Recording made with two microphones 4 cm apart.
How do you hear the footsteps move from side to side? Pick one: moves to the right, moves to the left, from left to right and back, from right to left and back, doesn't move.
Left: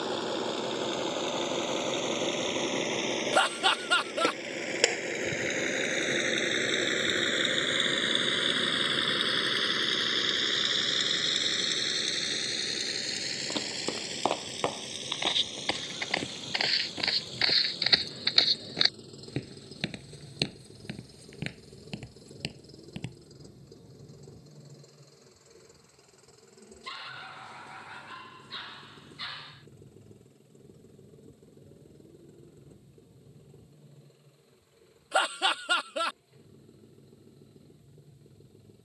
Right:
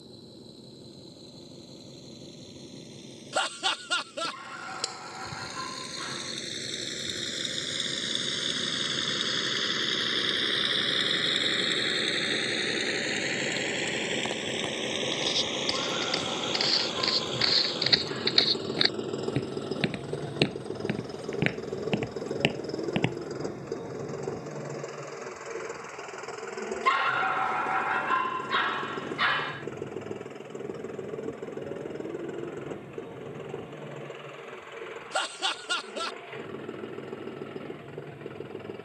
moves to the right.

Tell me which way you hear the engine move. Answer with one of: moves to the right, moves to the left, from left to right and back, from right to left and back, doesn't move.
moves to the right.